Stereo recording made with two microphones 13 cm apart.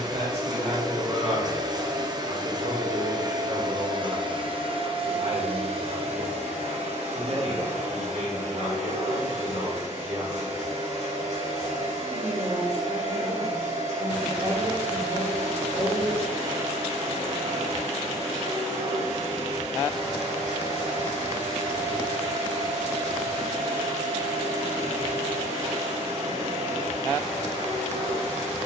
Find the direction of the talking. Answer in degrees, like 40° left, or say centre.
50° right.